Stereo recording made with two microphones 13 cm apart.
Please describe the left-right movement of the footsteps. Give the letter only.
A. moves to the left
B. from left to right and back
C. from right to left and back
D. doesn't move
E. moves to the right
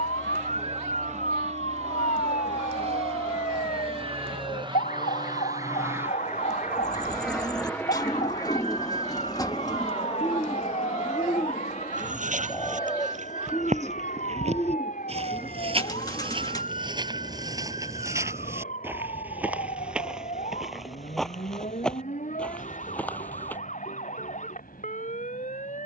A.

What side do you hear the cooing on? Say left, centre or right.
left.